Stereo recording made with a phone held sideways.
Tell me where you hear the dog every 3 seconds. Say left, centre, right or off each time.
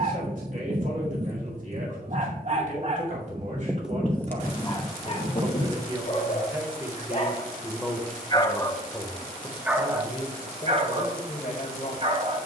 right, centre, left, right.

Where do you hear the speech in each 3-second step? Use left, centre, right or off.
right, right, centre, left.